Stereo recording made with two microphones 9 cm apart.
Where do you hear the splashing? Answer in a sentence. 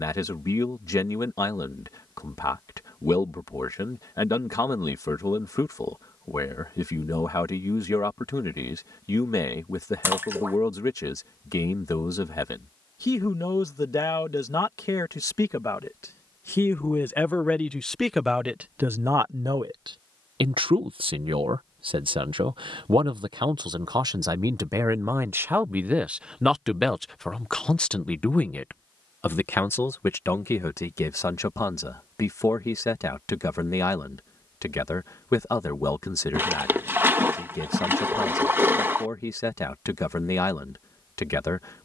You can hear the splashing on the right.